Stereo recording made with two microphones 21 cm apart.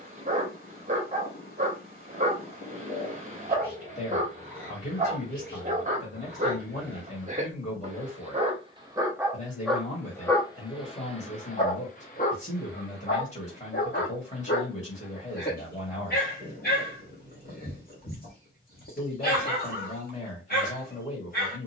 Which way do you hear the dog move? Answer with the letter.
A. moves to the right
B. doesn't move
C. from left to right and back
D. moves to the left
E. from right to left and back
D.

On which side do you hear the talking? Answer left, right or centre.
left.